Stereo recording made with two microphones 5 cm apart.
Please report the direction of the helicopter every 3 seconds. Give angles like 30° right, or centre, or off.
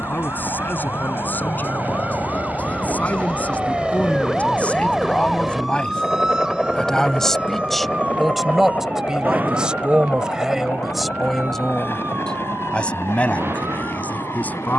40° right, 20° right, 20° left, 40° left, 50° left.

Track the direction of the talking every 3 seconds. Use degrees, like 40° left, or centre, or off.
40° left, 30° left, centre, 10° right, 30° left.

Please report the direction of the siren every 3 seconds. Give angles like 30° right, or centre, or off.
40° left, 10° left, 20° right, 40° right, 50° right.